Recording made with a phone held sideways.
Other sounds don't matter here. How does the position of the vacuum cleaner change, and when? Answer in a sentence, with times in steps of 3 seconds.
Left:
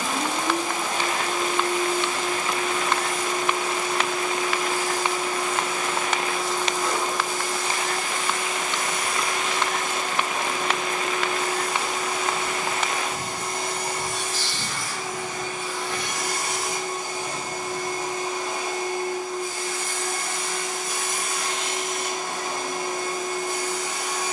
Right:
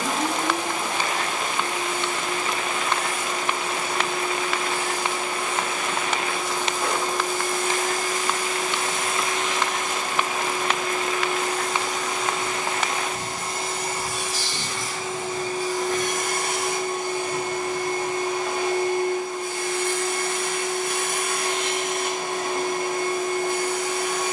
In this clip you hear the vacuum cleaner on the right from 0 s, in the centre from 9 s and on the right from 15 s.